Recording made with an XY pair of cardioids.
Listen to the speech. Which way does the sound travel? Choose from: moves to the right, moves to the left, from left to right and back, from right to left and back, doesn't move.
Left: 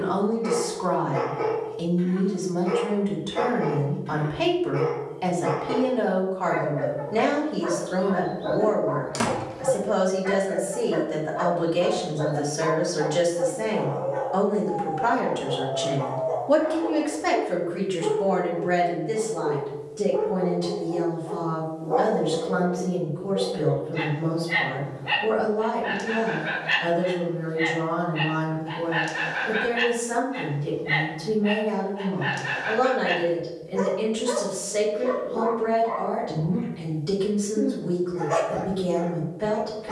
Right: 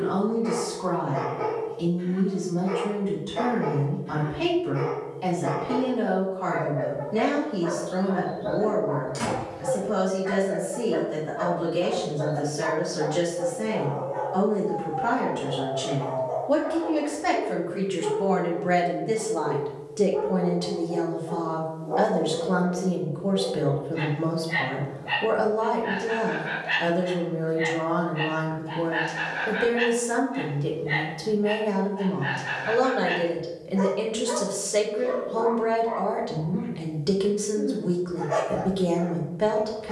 moves to the right.